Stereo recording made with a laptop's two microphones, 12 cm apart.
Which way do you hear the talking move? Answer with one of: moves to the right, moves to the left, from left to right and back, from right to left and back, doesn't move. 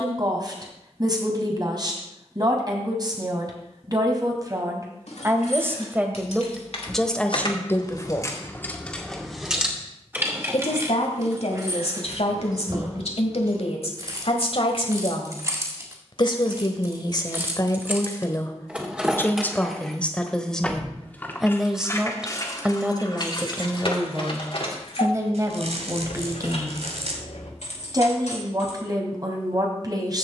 from right to left and back.